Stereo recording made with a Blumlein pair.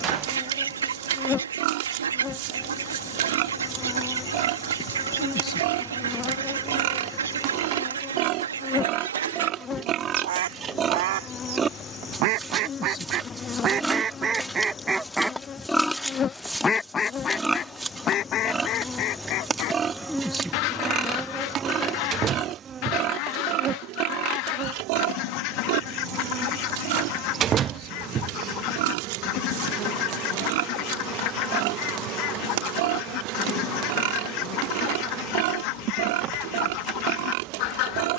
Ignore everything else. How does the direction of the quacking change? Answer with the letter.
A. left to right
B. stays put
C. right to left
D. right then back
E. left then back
C.